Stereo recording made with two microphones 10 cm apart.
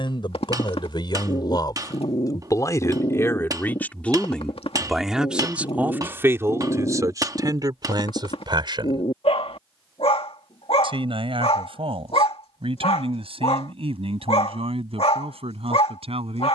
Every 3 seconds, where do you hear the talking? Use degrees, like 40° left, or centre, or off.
50° left, 10° left, 40° right, 60° right, 70° right, 70° right.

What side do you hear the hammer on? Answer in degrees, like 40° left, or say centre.
40° right.